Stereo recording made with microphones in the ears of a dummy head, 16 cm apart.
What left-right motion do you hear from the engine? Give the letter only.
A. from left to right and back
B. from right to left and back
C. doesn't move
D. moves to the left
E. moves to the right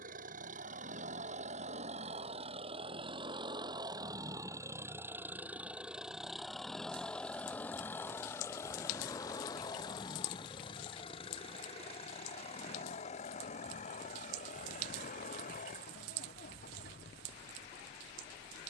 D.